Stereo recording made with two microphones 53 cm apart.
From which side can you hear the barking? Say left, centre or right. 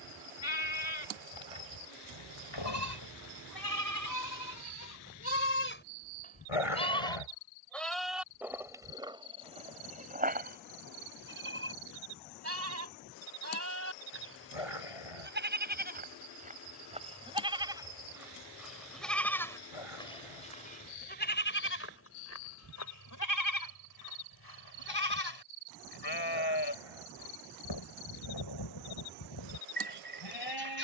left.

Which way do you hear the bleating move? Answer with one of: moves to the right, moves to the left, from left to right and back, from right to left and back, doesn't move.
from left to right and back.